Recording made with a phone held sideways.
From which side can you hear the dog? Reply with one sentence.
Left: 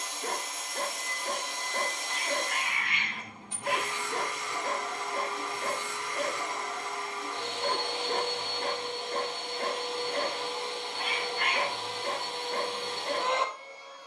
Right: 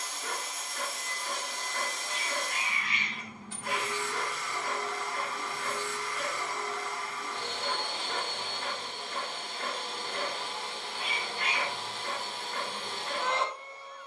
In this clip you hear the dog on the left.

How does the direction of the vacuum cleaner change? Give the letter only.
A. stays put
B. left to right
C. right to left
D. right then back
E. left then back
A.